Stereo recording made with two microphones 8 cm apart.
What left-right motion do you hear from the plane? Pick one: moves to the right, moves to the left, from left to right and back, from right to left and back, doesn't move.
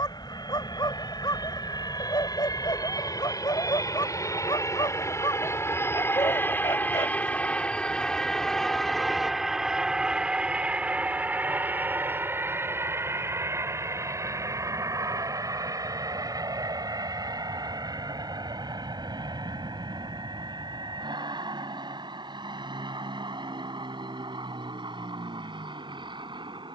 moves to the right.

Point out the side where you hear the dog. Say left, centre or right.
left.